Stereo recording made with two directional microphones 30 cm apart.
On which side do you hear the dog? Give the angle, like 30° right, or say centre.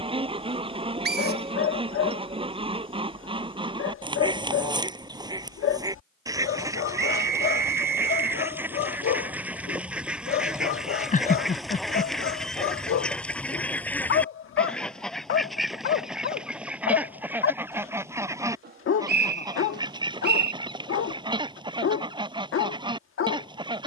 40° left.